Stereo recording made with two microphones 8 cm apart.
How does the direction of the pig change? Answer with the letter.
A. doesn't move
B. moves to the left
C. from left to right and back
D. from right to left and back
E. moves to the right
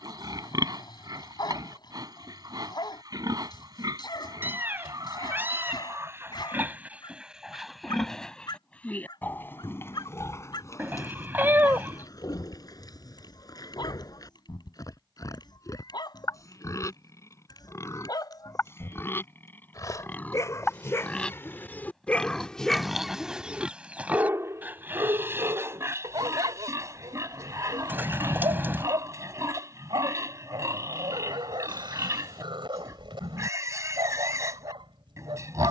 D.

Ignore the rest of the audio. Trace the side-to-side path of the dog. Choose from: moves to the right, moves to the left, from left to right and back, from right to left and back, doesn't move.
moves to the right.